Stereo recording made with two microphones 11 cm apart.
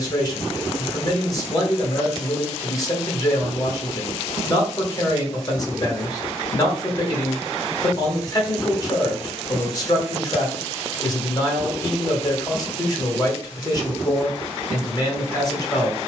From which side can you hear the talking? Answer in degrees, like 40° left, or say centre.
30° left.